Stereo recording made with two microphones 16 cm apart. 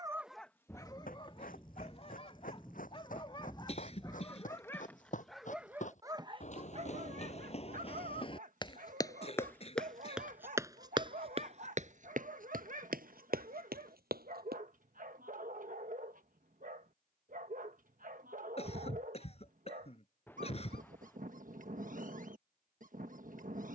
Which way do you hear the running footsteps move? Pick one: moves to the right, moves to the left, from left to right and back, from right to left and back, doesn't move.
moves to the right.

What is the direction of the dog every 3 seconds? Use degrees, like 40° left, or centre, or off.
30° left, 10° left, 50° right, 60° right, 60° right, 60° right, 60° right, 60° right.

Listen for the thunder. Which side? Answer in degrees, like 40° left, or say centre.
10° left.